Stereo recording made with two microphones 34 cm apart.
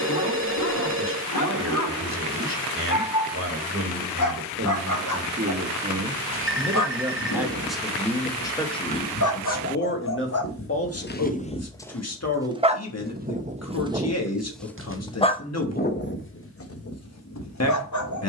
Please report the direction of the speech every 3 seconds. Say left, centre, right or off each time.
right, right, centre, left, left, left.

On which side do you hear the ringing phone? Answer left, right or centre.
right.